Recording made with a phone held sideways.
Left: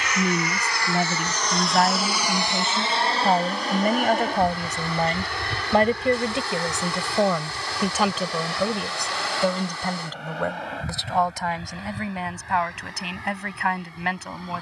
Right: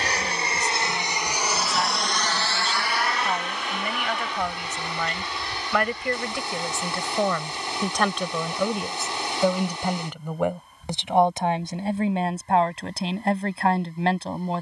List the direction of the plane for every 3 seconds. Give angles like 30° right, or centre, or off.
10° right, 50° left, 70° left, 70° left, 80° left.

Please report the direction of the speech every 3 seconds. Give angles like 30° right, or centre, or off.
60° left, 40° left, 10° left, 20° right, 30° right.